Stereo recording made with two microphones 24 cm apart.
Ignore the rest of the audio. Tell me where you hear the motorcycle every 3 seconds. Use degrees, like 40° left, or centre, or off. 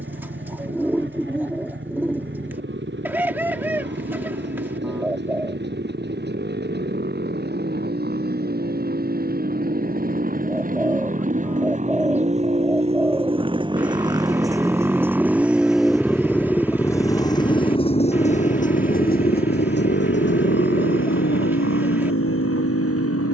60° right, 50° right, 50° right, 40° right, 20° right, 10° left, 40° left, 60° left.